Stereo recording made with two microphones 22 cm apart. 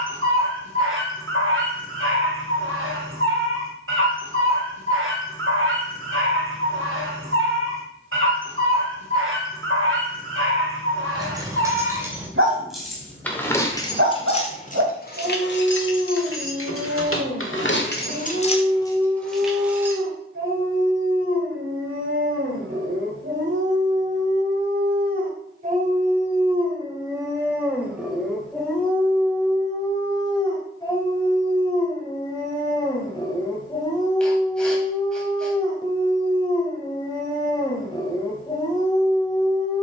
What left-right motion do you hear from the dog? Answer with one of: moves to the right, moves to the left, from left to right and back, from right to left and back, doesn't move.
moves to the left.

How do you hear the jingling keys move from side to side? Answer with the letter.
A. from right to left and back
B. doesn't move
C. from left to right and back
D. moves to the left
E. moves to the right
A.